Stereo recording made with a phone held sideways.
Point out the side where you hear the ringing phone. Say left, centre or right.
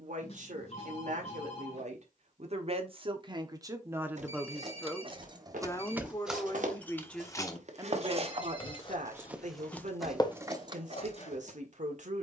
left.